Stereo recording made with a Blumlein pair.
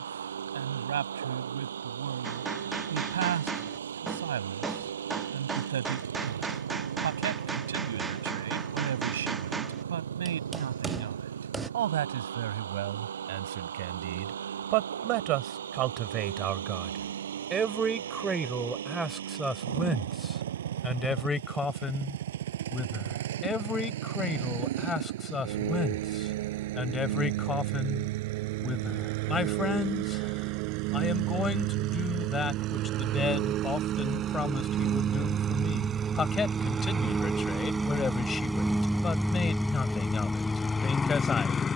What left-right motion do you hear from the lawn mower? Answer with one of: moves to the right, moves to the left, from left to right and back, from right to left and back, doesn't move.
moves to the left.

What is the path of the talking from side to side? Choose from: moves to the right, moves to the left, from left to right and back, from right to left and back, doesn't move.
moves to the left.